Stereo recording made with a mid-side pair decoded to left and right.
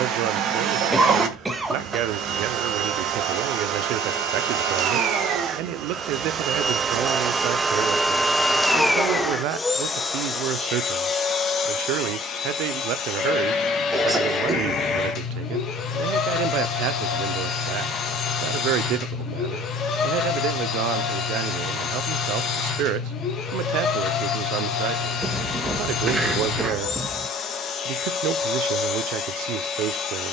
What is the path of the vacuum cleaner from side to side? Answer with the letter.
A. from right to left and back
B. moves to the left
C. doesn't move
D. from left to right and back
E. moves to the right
B.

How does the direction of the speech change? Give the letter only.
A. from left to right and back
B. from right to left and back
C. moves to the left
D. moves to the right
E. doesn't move
E.